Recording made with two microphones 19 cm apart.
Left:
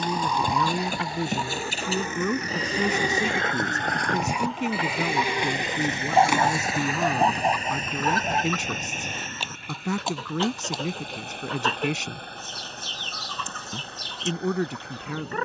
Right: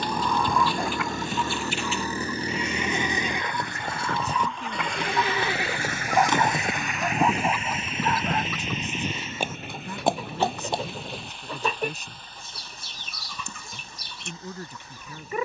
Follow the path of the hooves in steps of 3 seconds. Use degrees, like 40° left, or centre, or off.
40° left, 10° left, 30° right, 60° right, off.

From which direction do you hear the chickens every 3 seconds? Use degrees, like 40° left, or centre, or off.
40° left, 40° left, centre, 10° right, 10° right.